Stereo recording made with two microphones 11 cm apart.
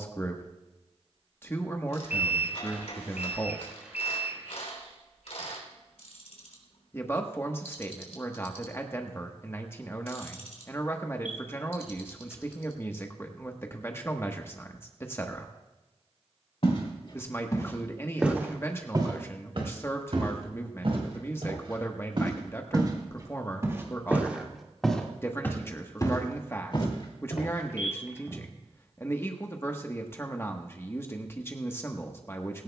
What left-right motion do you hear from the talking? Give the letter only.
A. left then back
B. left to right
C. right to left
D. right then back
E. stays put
E.